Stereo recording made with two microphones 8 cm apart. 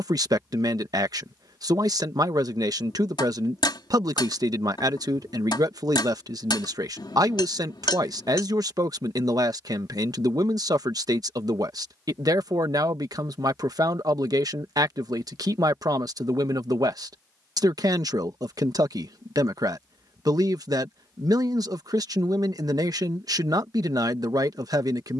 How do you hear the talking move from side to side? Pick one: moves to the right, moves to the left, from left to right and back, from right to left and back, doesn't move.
doesn't move.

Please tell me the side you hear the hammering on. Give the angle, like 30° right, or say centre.
70° left.